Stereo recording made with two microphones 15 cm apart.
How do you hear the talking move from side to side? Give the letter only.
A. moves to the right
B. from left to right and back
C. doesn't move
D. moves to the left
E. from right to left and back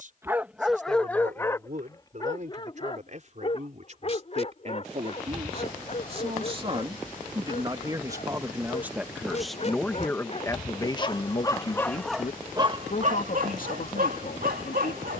D.